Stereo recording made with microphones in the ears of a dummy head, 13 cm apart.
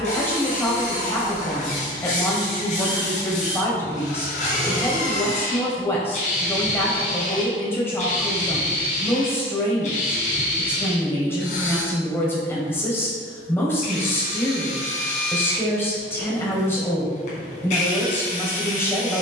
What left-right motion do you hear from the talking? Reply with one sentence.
You can hear the talking stay put.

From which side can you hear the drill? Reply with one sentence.
In this clip you hear the drill on the left.